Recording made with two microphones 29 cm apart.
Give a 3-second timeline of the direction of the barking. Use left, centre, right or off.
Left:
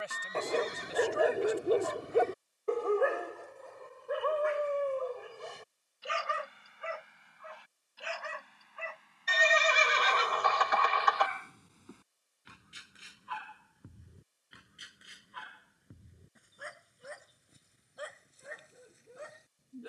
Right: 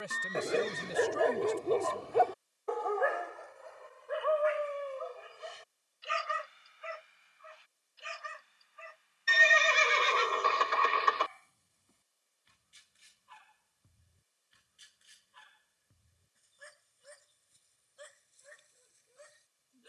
centre, left, left, left, left, left, left.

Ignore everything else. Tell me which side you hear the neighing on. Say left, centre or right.
right.